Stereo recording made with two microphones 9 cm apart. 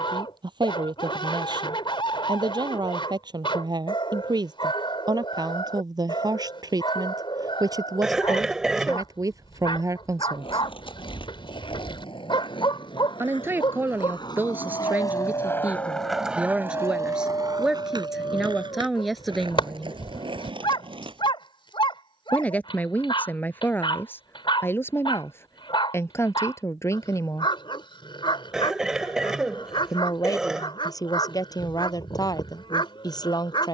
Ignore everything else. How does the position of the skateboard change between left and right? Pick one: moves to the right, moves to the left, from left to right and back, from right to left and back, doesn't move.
moves to the right.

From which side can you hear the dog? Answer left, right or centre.
left.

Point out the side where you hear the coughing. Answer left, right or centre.
centre.